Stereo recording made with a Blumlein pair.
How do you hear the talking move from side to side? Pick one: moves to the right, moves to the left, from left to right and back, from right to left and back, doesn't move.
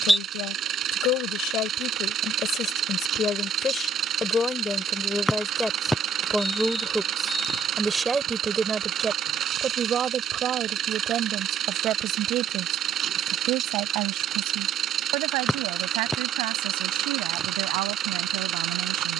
moves to the right.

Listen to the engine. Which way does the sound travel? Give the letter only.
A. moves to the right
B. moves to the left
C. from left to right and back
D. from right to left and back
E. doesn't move
E.